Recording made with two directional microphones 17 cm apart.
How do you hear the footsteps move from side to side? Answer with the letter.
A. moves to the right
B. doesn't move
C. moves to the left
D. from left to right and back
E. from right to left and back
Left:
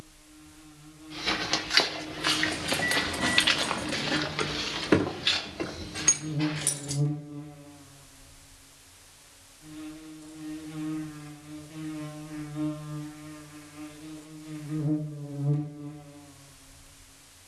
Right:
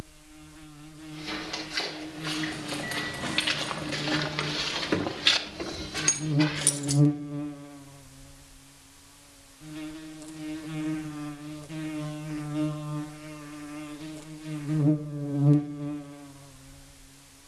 A.